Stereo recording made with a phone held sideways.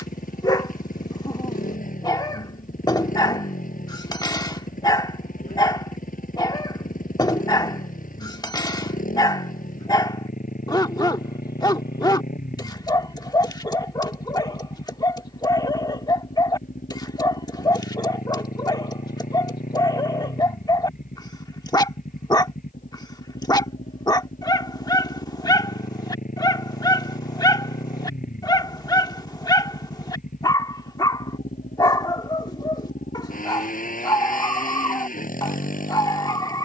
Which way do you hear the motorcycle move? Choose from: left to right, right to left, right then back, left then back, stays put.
stays put.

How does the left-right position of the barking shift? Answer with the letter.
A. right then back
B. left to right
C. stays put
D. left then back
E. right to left
C.